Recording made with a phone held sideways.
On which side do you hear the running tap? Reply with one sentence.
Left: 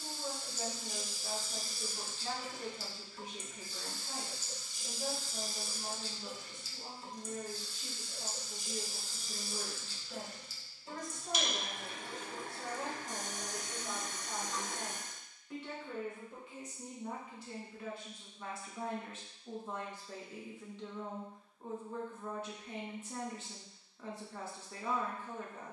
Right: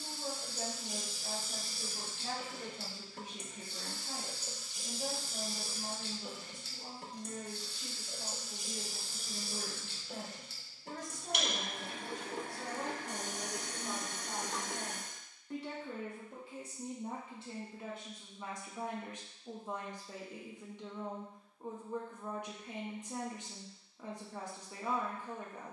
You can hear the running tap on the right.